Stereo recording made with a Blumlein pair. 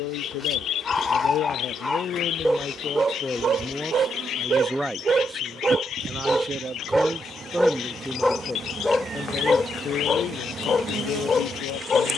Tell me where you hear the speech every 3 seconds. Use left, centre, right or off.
left, centre, centre, left.